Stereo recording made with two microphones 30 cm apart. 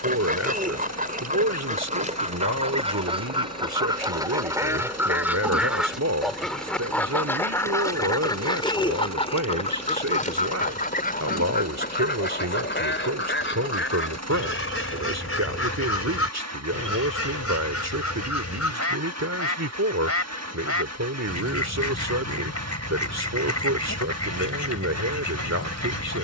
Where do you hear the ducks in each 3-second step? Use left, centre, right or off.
right, centre, centre, left, left, left, left, left, left.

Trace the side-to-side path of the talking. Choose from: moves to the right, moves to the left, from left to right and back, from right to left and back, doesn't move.
doesn't move.